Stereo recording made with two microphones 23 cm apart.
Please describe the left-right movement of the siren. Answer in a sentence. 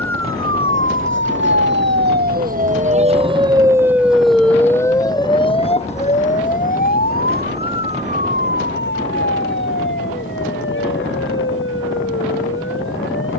In this clip you hear the siren move to the left.